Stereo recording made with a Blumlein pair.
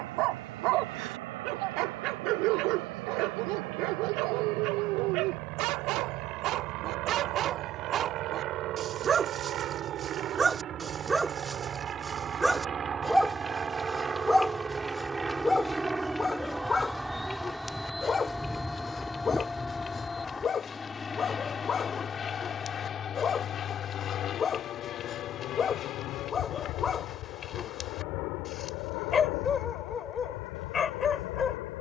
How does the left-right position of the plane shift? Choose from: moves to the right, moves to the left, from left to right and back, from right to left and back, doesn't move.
moves to the left.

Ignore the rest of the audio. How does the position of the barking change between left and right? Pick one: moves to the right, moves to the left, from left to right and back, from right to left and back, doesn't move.
moves to the left.